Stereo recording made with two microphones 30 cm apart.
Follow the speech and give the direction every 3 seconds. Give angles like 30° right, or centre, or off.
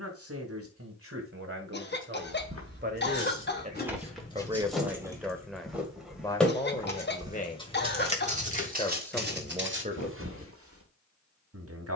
40° right, 10° right, 20° left, 20° right.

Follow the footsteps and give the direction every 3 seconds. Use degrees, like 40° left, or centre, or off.
50° right, 10° right, 20° right, 40° right.